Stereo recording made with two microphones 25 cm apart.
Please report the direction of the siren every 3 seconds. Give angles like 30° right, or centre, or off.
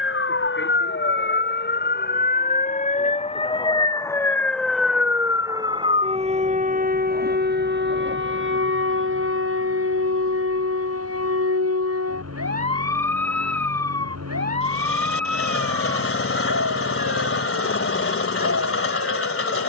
50° left, centre, 40° right, 60° right, 70° right, 80° right, 80° right.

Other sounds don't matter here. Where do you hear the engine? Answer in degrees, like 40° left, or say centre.
60° left.